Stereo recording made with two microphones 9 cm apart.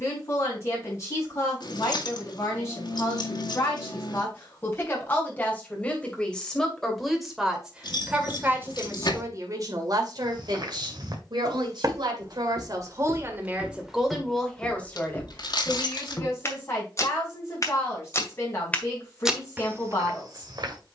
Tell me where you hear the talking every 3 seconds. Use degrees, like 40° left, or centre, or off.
40° left, 30° left, 10° right, 60° right, 20° right, 30° left, 40° left.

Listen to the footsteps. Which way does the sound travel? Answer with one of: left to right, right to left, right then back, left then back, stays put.
left then back.